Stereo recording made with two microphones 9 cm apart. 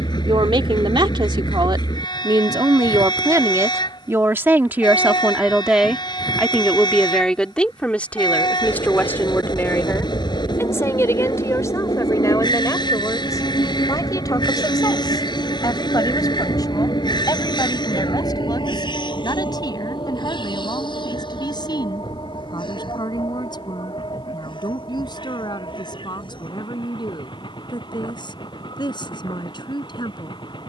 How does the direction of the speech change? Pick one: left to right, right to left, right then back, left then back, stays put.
right to left.